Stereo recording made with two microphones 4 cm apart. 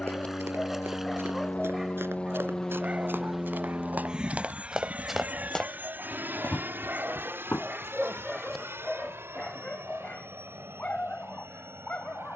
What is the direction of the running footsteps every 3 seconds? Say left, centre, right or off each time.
right, right, left, off.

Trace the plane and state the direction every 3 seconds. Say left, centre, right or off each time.
left, right, right, right.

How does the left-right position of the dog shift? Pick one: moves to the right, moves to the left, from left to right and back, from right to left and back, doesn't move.
from left to right and back.